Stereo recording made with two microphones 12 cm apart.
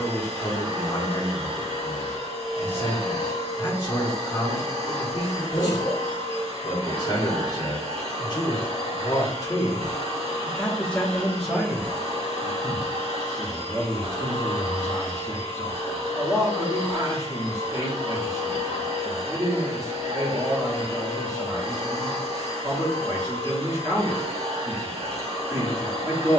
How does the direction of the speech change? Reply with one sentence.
You can hear the speech move from left to right.